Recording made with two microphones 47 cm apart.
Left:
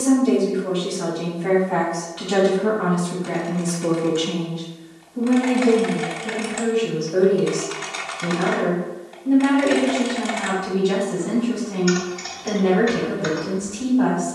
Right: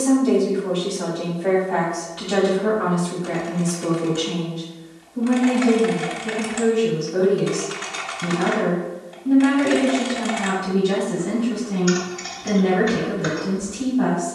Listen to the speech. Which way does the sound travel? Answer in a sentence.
In this clip you hear the speech move from left to right.